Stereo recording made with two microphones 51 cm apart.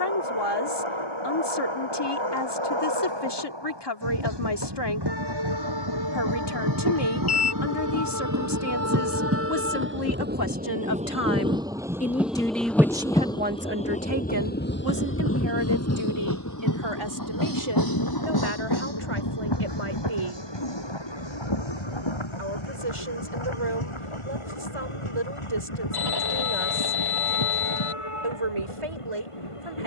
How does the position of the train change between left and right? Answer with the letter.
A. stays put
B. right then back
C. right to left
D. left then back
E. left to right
C.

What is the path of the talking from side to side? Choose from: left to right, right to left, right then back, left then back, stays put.
left to right.